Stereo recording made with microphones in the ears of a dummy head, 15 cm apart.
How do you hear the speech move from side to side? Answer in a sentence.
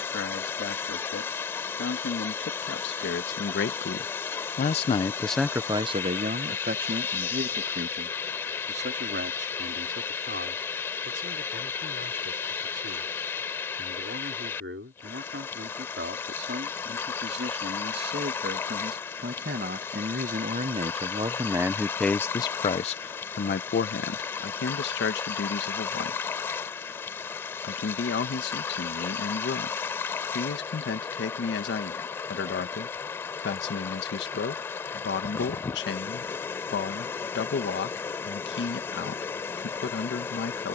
In this clip you hear the speech move from left to right and back again.